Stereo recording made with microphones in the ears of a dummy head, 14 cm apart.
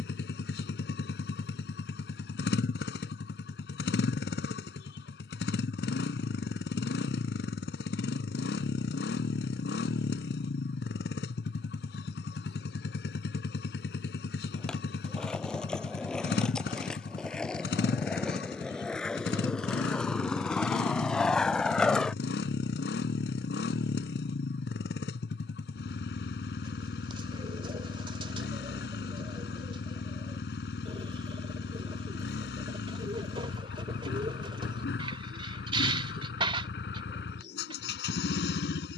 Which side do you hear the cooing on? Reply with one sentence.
In this clip you hear the cooing on the right.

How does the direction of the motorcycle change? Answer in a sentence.
You can hear the motorcycle stay put.